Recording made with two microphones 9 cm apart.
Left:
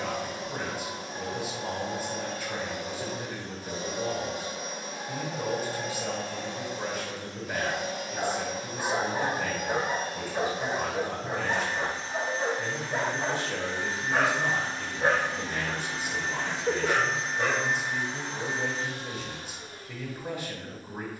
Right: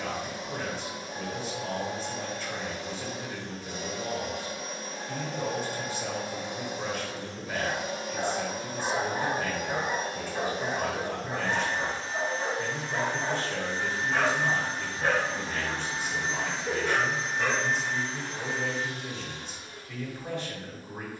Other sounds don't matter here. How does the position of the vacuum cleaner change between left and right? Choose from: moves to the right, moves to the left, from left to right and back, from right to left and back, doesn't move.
from left to right and back.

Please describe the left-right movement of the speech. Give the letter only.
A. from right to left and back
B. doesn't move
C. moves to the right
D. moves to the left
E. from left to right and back
B.